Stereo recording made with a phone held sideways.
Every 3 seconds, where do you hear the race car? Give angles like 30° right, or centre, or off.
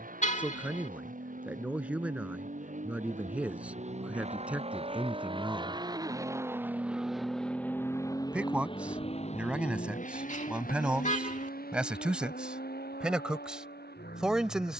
60° right, 40° right, 10° left, 50° left, 70° left.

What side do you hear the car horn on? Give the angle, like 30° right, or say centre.
50° left.